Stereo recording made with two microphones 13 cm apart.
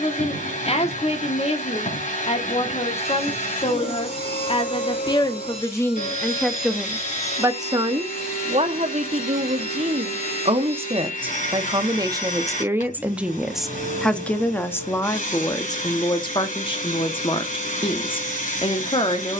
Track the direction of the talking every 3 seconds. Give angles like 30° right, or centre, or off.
50° left, 40° left, 20° right, 40° right, centre, 30° left, 40° left.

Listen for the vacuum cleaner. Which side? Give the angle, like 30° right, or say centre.
70° left.